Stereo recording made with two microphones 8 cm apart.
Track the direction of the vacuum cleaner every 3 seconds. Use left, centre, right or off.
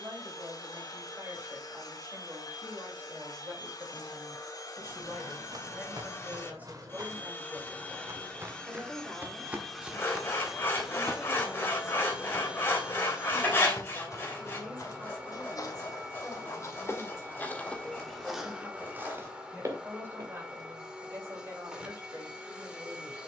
left, left, left, centre, centre, centre, centre, centre.